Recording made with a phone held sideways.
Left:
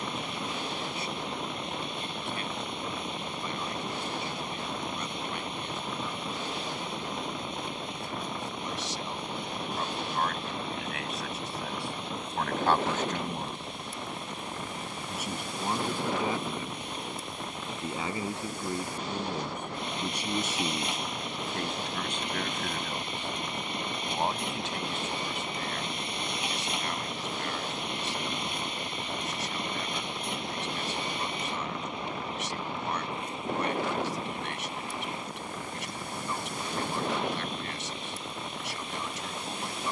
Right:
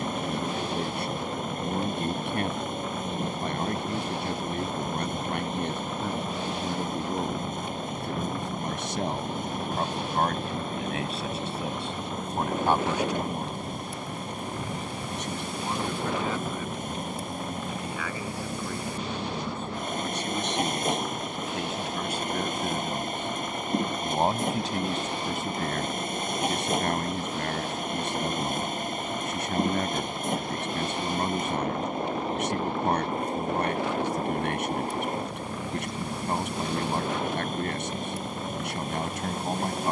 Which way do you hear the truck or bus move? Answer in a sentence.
In this clip you hear the truck or bus stay in one place.